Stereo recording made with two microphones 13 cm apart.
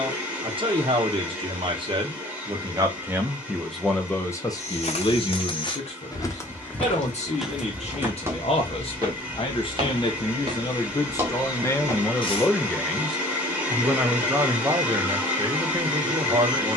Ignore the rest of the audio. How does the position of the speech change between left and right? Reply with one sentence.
In this clip you hear the speech move from right to left and back again.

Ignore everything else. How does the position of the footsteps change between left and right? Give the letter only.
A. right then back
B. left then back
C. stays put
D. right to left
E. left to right
A.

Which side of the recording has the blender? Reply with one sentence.
You can hear the blender in the centre.